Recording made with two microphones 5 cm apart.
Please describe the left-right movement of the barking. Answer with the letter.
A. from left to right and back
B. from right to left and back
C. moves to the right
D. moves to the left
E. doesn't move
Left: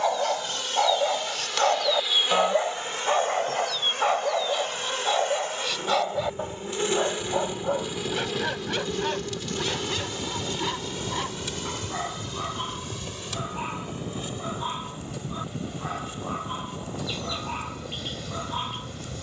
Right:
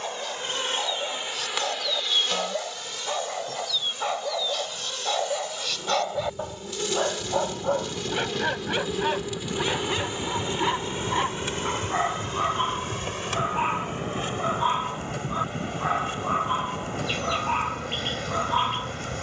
C.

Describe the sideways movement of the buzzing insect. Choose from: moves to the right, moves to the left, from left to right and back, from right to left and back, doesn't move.
from right to left and back.